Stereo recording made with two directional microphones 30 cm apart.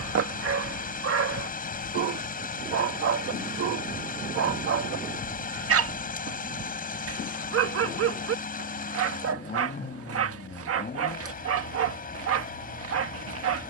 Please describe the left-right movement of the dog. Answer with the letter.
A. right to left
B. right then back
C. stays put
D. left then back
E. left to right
C.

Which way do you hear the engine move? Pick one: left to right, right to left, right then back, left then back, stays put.
stays put.